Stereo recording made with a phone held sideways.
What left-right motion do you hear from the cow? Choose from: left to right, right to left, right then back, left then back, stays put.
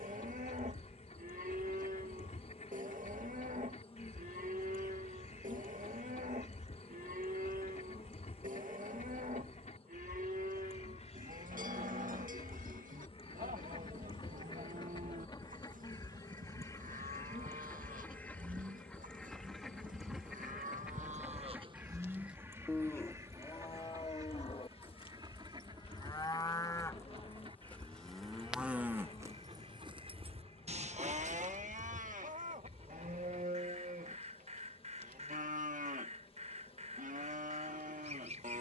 left then back.